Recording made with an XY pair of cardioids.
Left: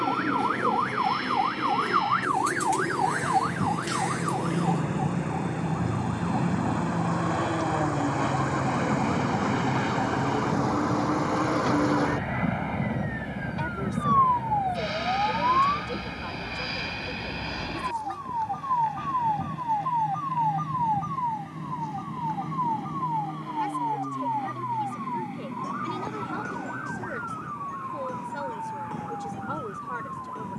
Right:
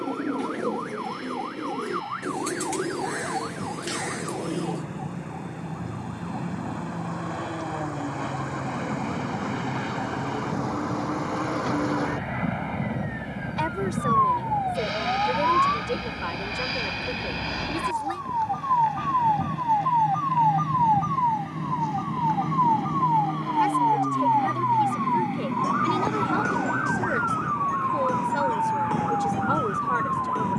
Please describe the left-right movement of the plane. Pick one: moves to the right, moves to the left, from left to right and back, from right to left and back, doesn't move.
moves to the right.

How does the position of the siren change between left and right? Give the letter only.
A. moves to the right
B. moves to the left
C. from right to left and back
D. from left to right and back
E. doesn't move
A.